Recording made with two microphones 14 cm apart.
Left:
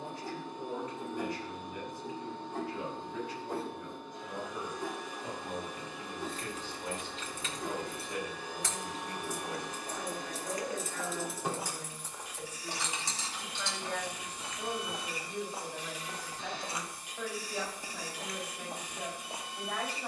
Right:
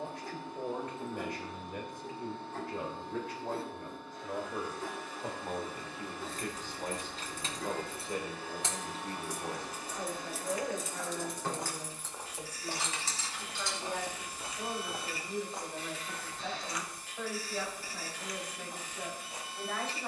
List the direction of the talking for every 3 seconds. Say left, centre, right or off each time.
right, right, right, right, centre, centre, centre.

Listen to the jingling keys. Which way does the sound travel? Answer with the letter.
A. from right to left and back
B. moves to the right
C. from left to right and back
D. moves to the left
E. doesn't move
D.